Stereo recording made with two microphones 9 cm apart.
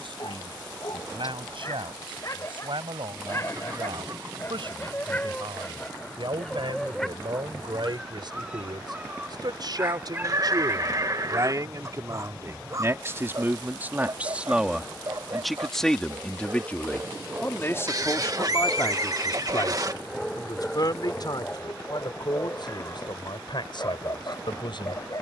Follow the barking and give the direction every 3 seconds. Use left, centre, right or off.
left, left, centre, right, right, right, centre, left, left.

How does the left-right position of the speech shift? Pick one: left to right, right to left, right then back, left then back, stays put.
right to left.